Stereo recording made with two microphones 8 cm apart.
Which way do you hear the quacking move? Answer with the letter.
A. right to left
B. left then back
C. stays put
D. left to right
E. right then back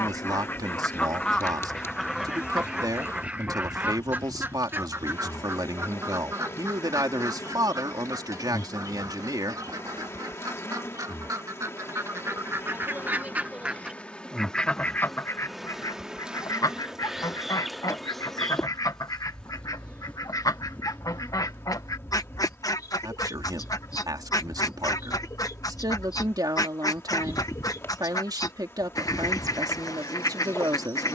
E.